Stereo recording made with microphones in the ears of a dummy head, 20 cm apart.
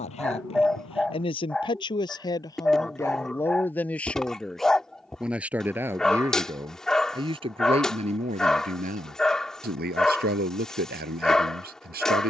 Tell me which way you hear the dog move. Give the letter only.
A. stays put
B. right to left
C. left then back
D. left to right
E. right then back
A.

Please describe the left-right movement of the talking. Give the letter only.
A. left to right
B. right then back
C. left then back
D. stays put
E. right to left
A.